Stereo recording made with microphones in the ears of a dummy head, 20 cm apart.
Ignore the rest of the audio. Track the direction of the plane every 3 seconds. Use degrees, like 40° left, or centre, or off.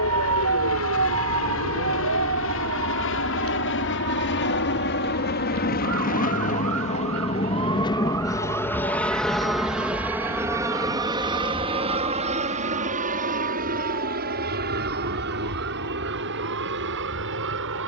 70° left, 50° left, 20° left, 10° right, 40° right, 50° right.